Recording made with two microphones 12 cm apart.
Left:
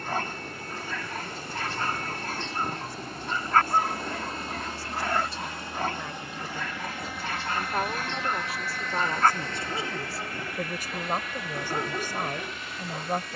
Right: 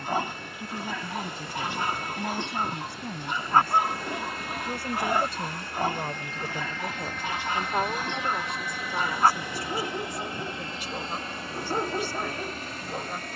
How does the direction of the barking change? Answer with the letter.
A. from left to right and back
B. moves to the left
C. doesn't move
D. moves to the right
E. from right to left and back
C.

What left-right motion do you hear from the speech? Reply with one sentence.
You can hear the speech go from the right side to the left.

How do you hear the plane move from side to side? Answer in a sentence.
In this clip you hear the plane go from the left side to the right.